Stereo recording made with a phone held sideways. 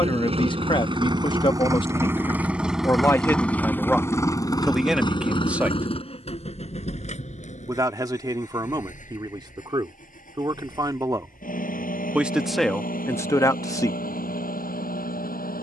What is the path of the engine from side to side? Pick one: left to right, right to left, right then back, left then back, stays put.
right to left.